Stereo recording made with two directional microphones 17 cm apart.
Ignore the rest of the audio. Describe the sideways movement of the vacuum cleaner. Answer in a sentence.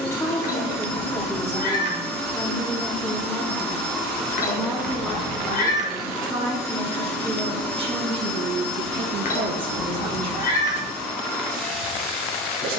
In this clip you hear the vacuum cleaner stay in one place.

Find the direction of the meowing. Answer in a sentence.
You can hear the meowing on the left.